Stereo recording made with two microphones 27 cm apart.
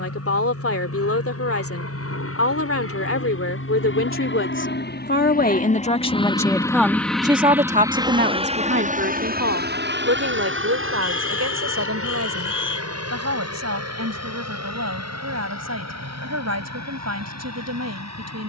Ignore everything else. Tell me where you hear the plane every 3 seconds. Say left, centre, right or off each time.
left, left, centre, right, right, right.